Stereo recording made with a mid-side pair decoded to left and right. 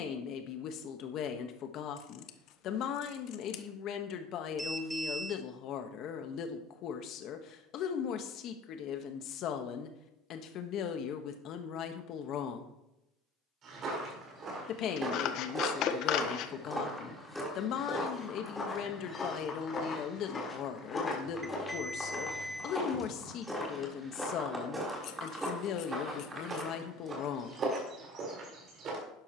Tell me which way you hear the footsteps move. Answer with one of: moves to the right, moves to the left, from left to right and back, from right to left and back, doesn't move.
from right to left and back.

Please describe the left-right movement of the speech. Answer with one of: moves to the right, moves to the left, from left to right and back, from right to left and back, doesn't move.
doesn't move.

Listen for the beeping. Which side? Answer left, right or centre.
centre.